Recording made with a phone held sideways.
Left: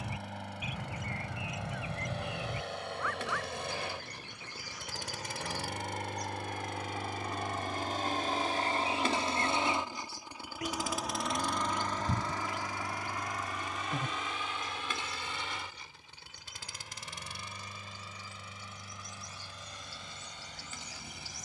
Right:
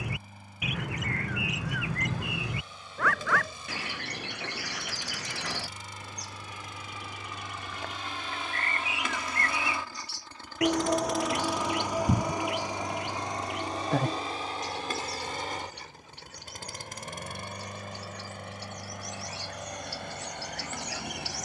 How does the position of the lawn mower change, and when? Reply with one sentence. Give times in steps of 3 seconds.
In this clip you hear the lawn mower on the left from 0 s, in the centre from 9 s and on the right from 12 s.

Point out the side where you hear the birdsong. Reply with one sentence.
In this clip you hear the birdsong on the right.